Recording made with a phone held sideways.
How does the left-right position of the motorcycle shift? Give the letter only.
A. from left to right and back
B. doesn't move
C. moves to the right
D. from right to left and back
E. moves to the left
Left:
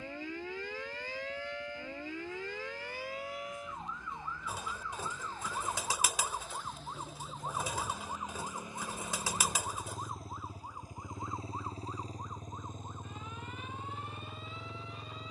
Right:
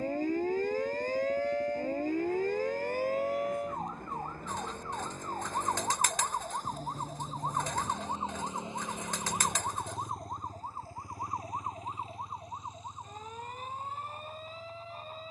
E.